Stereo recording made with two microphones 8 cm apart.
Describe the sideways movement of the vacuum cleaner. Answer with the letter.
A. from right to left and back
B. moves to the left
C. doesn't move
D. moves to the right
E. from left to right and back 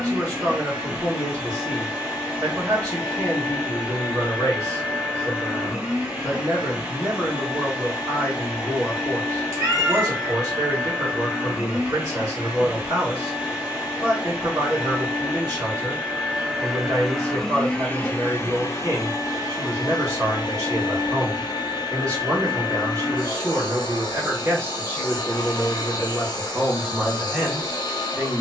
B.